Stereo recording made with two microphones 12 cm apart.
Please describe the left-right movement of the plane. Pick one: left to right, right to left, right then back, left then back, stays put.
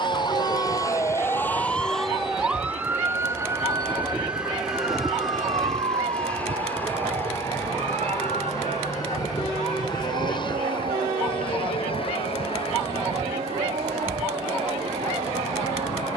right to left.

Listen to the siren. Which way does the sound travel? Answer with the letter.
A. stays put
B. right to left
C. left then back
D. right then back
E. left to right
E.